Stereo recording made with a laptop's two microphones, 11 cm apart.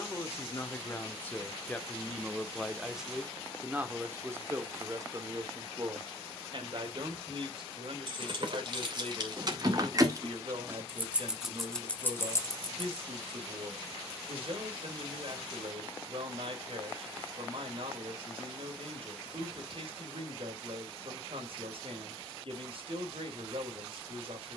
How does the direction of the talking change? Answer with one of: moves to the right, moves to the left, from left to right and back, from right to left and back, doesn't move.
moves to the right.